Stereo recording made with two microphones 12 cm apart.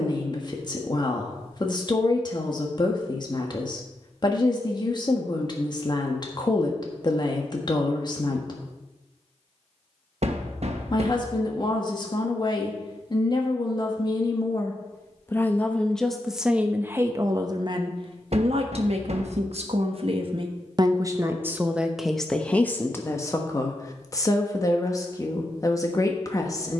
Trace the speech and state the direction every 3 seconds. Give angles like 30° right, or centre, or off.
40° left, 40° left, 40° left, 40° left, 40° left, 10° right, 50° right, centre, 30° left.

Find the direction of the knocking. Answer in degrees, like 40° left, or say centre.
60° right.